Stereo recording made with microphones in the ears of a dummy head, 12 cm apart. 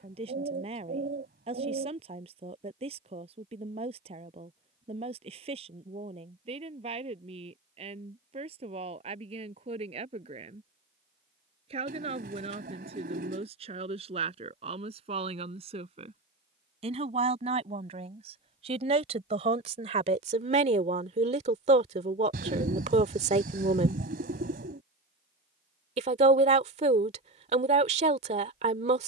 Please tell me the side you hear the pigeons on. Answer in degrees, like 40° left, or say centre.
80° right.